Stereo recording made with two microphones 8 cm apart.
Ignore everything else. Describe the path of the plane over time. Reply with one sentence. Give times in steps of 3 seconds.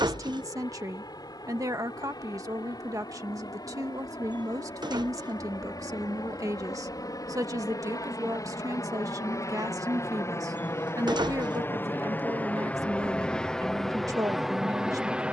You can hear the plane on the left from 0 s and in the centre from 12 s.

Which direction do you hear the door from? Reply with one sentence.
In this clip you hear the door on the right.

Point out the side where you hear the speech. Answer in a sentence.
In this clip you hear the speech on the right.